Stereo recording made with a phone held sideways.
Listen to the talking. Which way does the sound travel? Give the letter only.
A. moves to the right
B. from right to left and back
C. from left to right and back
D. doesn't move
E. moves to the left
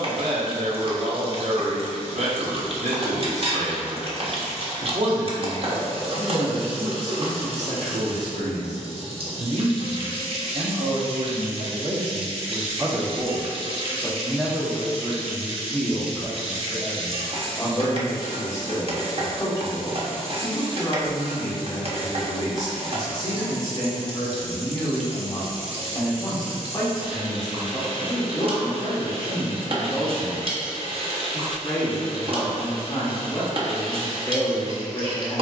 E.